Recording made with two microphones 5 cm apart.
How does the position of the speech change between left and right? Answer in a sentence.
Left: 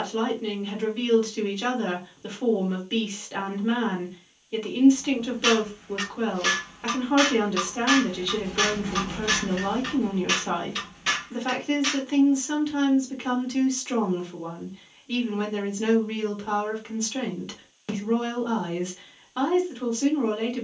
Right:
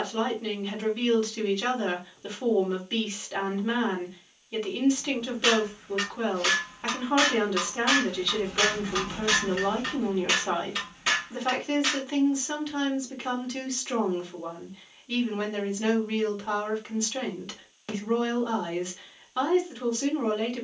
In this clip you hear the speech stay put.